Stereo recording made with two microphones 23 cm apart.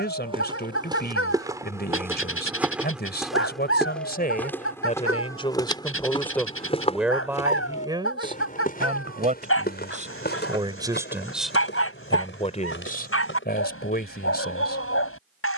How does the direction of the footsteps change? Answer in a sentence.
You can hear the footsteps go from the right side to the left.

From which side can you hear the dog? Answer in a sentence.
In this clip you hear the dog on the left.